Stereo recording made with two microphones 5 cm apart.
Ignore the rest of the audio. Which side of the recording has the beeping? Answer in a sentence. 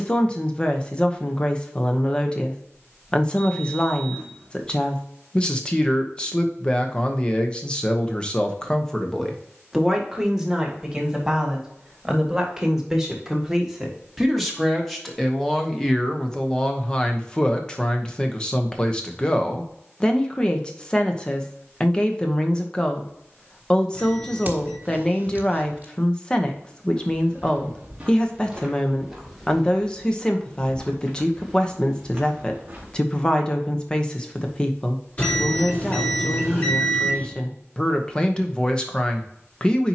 You can hear the beeping on the left.